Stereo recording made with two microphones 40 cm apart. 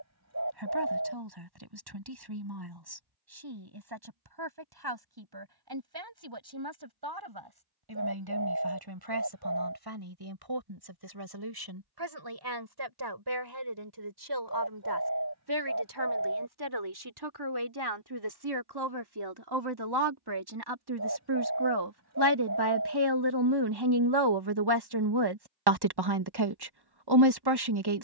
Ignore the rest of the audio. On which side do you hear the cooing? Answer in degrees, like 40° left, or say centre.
40° right.